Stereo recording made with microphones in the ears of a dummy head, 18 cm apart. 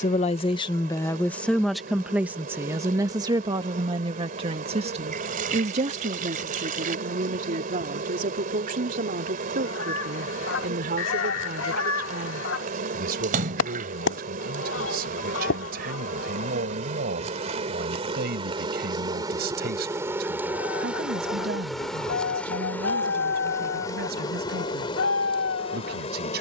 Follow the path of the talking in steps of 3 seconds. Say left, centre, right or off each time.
centre, right, right, right, right, right, right, right, right.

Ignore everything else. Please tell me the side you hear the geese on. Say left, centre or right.
left.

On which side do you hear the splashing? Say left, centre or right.
right.